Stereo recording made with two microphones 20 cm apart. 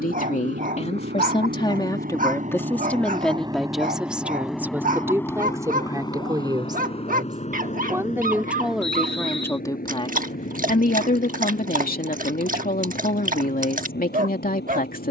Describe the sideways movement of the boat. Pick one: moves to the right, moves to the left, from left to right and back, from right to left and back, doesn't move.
moves to the left.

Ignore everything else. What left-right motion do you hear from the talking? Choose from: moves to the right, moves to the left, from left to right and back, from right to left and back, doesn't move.
from left to right and back.